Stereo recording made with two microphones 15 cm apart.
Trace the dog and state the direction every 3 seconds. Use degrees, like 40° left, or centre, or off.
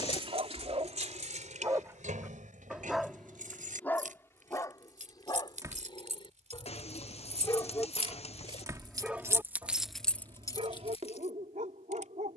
30° right, 20° left, 20° left, 40° right.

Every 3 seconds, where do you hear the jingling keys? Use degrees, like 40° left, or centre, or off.
50° right, 60° right, 40° right, 10° left.